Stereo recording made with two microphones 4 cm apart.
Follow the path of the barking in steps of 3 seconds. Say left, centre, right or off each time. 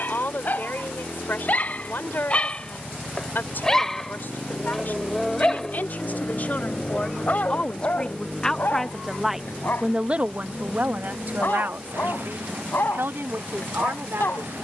left, centre, left, left, left.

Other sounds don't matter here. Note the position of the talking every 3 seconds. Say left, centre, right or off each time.
left, left, left, right, right.